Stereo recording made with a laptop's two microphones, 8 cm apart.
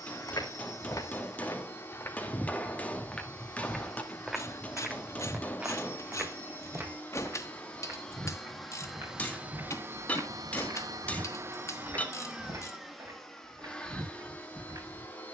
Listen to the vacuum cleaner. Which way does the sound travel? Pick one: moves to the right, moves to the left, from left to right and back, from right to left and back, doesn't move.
from left to right and back.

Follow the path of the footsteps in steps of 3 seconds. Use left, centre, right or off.
left, centre, right, right, right.